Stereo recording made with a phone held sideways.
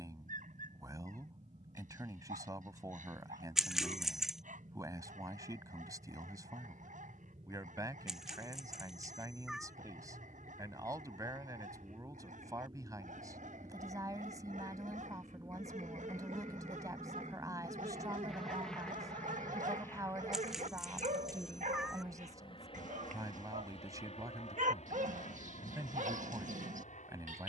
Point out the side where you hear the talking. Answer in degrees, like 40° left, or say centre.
30° right.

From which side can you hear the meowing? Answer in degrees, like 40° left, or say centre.
centre.